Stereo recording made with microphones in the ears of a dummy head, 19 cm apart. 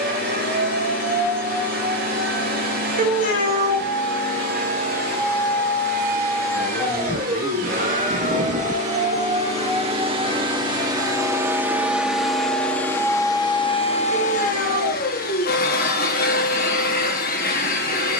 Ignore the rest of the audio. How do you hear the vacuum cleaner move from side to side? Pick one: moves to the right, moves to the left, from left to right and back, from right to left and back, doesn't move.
moves to the left.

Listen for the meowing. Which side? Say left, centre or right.
right.